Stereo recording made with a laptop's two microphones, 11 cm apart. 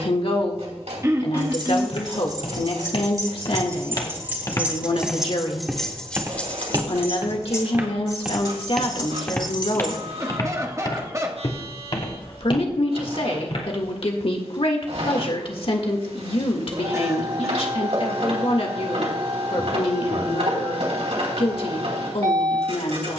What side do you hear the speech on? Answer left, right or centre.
left.